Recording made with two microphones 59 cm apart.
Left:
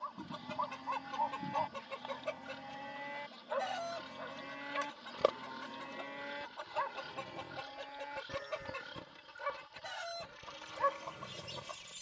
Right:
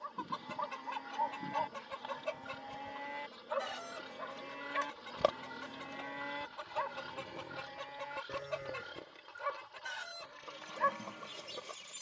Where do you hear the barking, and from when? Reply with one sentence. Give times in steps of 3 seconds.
You can hear the barking on the right from 0 s, in the centre from 6 s and on the left from 9 s.